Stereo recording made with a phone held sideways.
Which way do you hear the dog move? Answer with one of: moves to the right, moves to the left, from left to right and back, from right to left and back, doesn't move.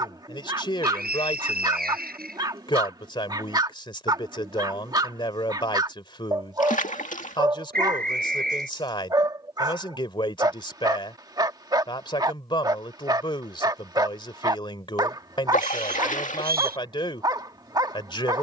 doesn't move.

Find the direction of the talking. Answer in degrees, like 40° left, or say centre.
30° left.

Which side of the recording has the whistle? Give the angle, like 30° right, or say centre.
70° right.